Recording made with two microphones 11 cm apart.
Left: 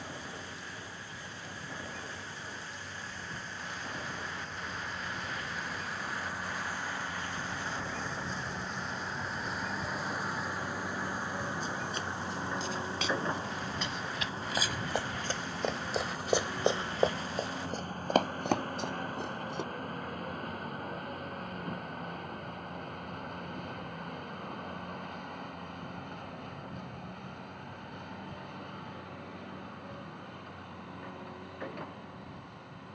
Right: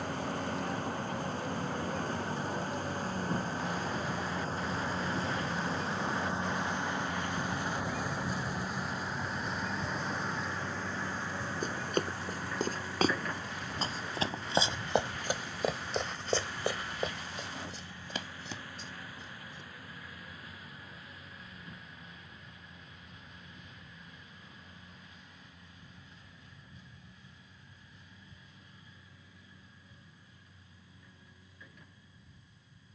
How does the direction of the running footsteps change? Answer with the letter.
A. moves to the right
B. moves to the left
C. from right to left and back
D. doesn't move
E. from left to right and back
B.